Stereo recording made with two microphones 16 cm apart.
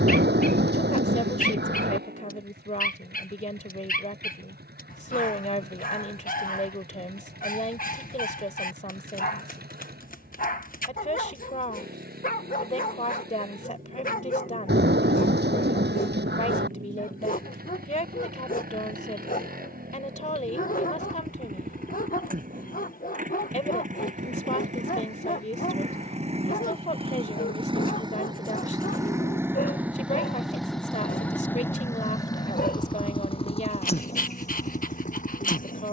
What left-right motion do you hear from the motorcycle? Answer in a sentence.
In this clip you hear the motorcycle move to the left.